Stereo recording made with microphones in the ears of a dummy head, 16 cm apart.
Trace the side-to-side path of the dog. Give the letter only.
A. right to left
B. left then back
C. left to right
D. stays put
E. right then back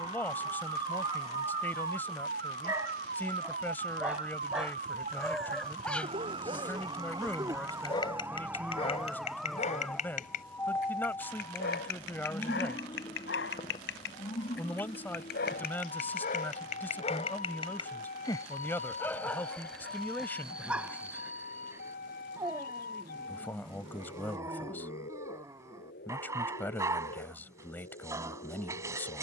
B.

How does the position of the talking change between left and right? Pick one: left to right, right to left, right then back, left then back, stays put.
stays put.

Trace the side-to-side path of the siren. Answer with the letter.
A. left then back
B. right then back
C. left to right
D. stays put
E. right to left
E.